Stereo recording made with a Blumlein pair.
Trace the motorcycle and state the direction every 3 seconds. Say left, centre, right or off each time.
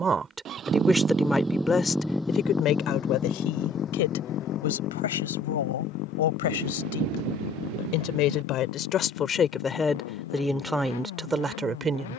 centre, left, left, left.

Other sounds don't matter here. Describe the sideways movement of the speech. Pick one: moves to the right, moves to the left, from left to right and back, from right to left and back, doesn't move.
from right to left and back.